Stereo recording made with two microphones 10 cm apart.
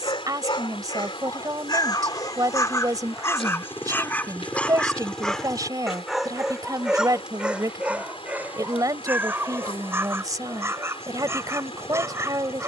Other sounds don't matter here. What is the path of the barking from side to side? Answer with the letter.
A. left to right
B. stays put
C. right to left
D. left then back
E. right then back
A.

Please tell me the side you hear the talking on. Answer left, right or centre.
right.